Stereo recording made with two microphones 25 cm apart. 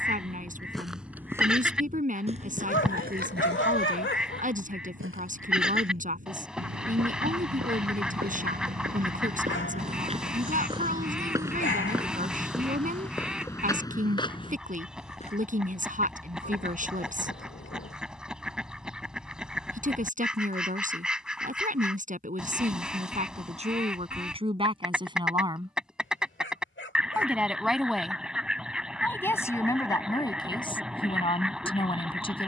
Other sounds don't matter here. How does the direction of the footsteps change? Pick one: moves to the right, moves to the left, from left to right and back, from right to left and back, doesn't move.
from left to right and back.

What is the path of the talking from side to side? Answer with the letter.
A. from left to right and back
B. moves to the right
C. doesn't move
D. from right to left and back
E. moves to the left
E.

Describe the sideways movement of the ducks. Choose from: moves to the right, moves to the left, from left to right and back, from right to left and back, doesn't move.
doesn't move.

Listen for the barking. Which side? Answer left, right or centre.
left.